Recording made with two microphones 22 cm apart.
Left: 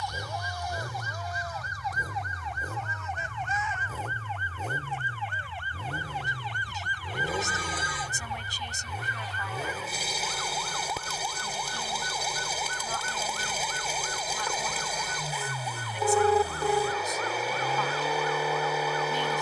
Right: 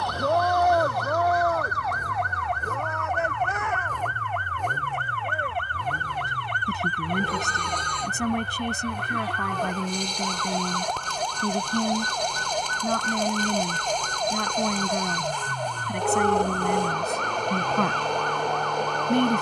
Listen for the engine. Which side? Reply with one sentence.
In this clip you hear the engine in the centre.